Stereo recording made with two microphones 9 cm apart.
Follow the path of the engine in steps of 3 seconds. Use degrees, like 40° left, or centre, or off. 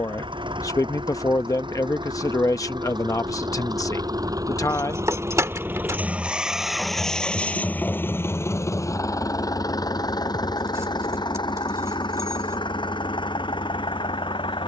70° right, 40° right, 10° left, 50° left, 60° left.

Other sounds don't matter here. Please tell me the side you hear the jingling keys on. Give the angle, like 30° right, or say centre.
40° right.